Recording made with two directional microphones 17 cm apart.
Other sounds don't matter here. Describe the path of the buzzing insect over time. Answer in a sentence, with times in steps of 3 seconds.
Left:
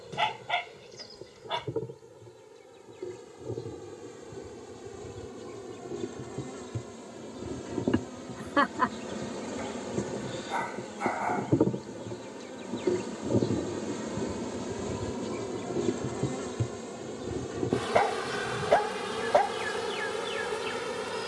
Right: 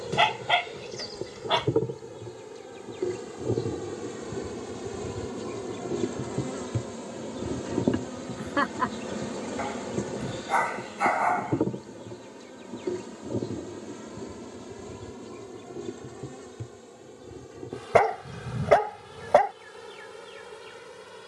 You can hear the buzzing insect on the right from 0 s, in the centre from 9 s and on the left from 12 s.